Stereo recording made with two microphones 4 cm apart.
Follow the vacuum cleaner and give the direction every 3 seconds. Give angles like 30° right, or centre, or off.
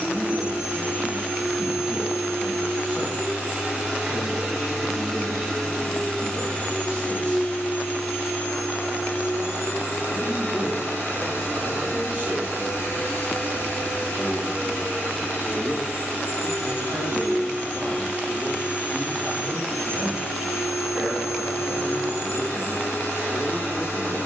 30° right, 10° right, 40° left, 70° left, 70° left, 70° left, 70° left, 70° left.